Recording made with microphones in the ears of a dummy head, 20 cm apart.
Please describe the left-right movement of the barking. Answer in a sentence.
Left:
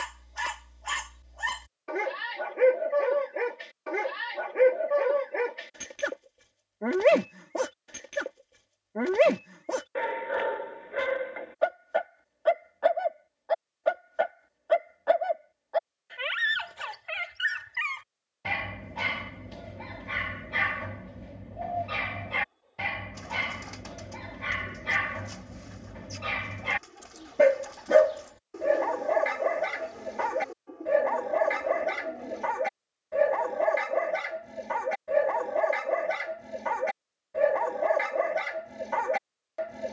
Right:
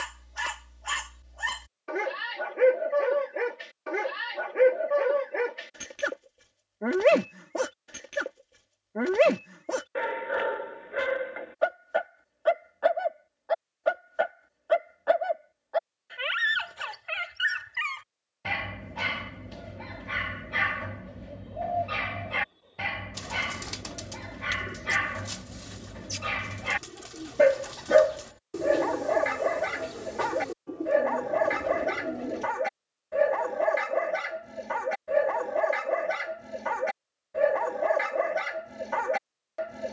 In this clip you hear the barking stay in one place.